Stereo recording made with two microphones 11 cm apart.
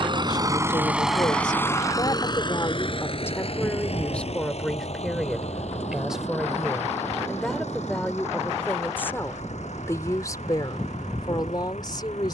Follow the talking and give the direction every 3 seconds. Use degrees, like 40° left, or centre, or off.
40° left, 10° left, centre, 30° left.